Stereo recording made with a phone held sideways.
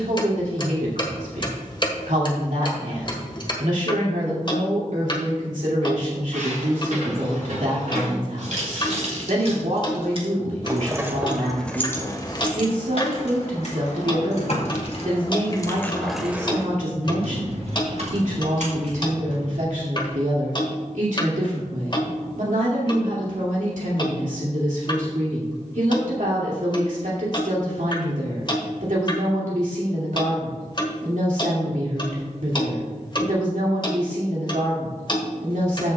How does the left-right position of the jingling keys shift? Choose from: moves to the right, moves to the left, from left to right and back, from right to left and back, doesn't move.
from right to left and back.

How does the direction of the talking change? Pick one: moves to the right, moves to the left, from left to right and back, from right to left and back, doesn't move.
doesn't move.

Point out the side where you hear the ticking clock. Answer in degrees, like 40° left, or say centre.
40° left.